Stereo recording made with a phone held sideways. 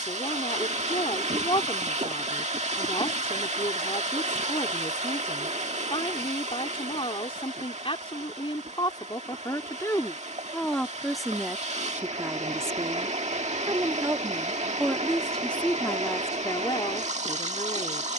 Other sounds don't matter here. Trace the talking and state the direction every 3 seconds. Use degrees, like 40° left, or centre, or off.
30° left, 30° left, 30° left, 10° left, 20° right, 20° left.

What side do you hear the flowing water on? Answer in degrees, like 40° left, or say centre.
50° right.